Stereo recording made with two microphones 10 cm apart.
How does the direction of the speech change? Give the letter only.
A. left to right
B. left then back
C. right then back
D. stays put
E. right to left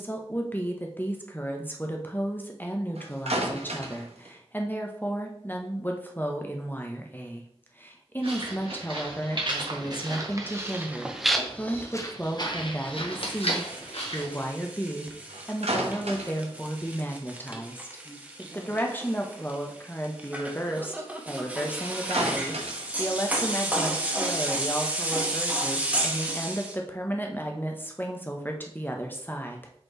D.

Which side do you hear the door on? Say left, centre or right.
right.